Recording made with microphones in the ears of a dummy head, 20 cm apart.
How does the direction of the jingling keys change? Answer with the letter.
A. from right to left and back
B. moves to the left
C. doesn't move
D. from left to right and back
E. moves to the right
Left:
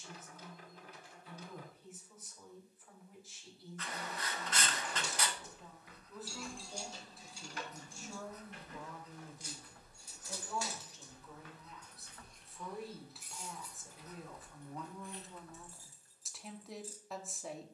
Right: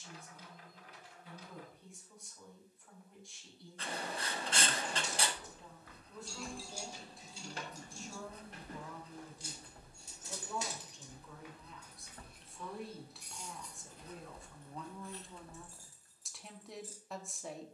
D.